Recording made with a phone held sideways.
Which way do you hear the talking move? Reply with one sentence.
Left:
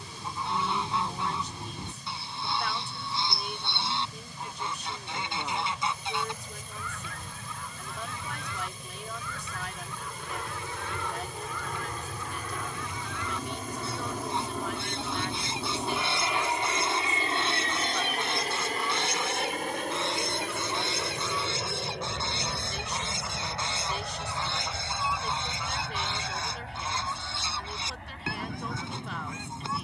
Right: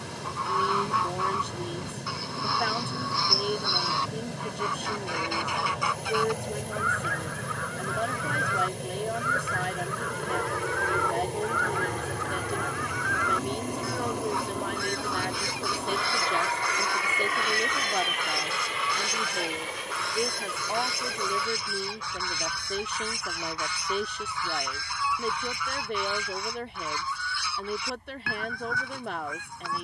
You can hear the talking stay in one place.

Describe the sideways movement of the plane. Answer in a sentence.
You can hear the plane travel towards the left.